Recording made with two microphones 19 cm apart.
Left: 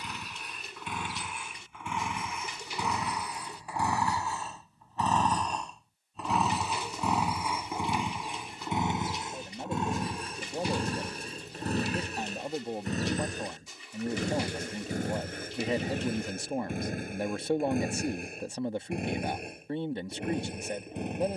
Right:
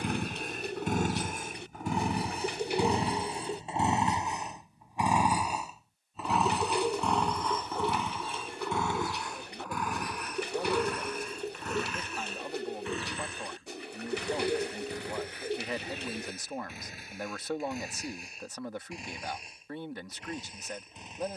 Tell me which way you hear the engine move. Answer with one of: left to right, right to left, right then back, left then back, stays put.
right to left.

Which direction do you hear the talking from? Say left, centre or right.
left.